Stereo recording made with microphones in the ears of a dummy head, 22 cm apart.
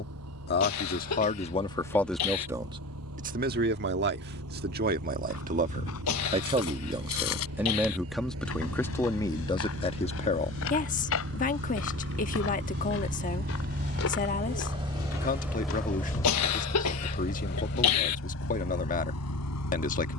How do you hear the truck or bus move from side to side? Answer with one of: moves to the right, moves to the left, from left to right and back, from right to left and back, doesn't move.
moves to the left.